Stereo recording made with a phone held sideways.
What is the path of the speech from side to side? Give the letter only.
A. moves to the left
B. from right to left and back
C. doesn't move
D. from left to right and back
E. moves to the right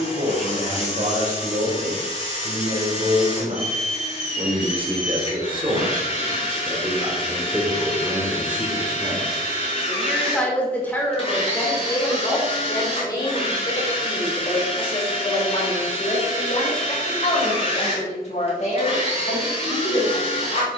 A.